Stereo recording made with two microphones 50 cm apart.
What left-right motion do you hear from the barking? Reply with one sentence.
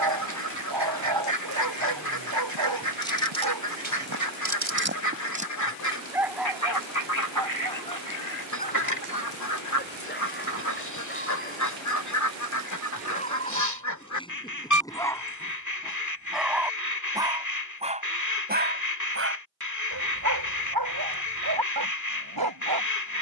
In this clip you hear the barking move from right to left and back again.